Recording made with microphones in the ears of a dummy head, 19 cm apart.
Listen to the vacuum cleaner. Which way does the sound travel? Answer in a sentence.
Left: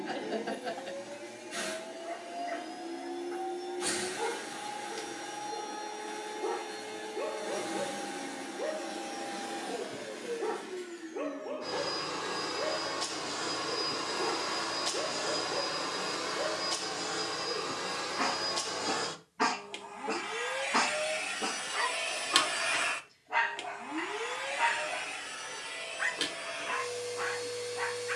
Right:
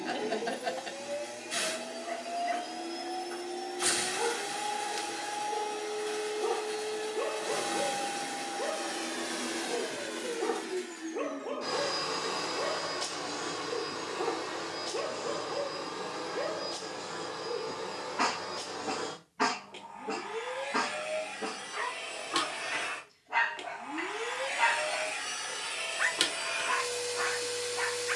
In this clip you hear the vacuum cleaner move from right to left and back again.